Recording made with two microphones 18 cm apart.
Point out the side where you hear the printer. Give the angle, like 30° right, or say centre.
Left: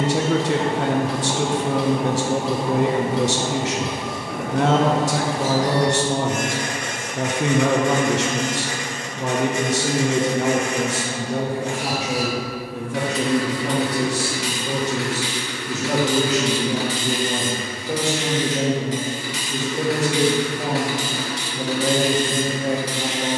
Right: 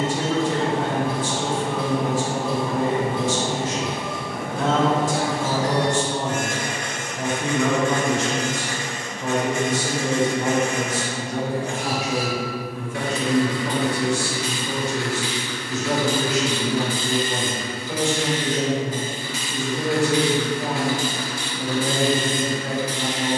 70° left.